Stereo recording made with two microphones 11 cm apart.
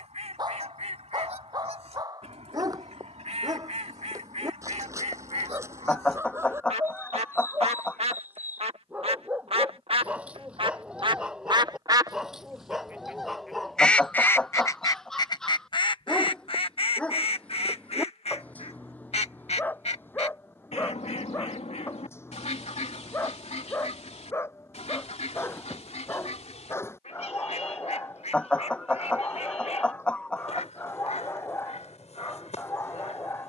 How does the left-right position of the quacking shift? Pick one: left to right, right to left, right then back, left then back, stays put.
right to left.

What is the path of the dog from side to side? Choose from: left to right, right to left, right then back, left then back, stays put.
right to left.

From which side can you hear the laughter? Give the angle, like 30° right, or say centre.
10° left.